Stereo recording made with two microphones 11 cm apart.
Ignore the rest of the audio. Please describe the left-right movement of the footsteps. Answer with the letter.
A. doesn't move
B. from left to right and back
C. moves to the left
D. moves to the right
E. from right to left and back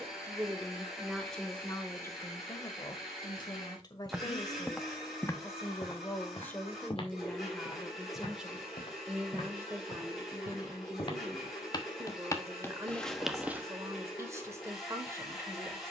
E.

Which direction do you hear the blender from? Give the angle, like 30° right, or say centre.
centre.